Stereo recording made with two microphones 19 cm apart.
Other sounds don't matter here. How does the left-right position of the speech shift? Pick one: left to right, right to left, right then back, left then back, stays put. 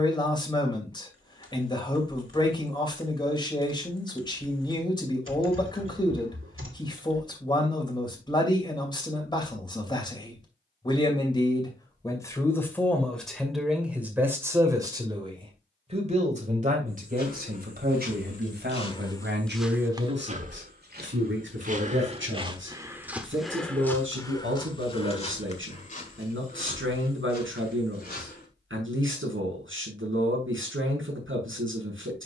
left to right.